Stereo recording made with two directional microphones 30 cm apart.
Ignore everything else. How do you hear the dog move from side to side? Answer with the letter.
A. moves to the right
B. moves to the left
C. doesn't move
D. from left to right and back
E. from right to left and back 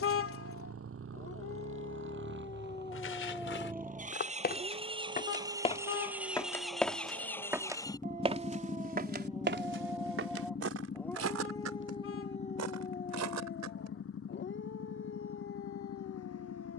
D.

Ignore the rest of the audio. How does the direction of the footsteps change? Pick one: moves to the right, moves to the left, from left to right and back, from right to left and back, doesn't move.
moves to the right.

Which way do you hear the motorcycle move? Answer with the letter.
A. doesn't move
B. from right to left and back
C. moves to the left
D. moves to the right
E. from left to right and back
C.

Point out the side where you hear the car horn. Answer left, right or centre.
left.